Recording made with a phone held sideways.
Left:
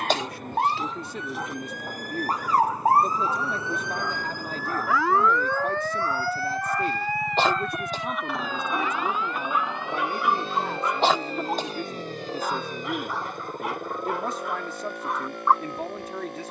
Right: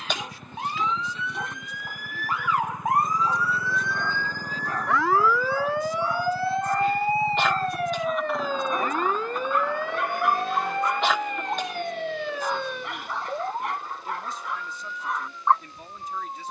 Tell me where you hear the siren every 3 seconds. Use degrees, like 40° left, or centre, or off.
50° left, 10° left, 30° right, 50° right, 60° right, 60° right.